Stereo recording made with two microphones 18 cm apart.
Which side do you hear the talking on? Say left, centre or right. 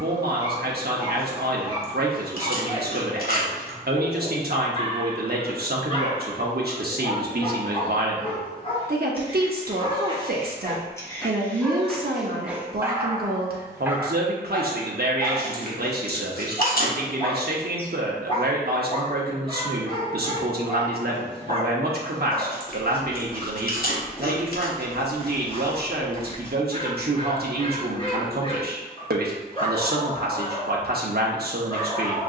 right.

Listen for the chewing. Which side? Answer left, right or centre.
left.